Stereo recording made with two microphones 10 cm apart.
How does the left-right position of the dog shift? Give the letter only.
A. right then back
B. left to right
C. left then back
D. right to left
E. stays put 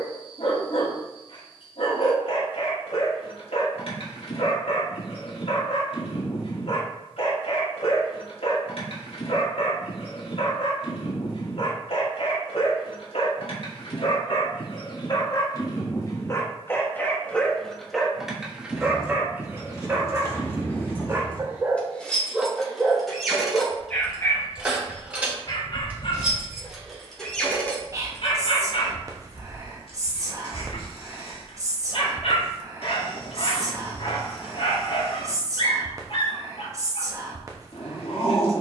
A.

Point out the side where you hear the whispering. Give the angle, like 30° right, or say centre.
30° right.